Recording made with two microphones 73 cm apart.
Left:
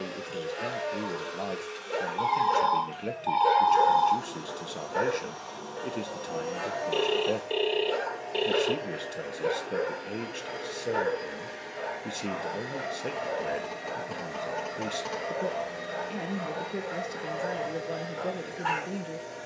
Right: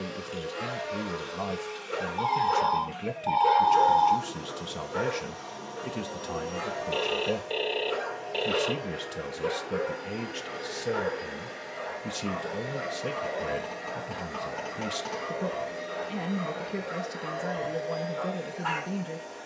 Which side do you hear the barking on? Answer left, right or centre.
right.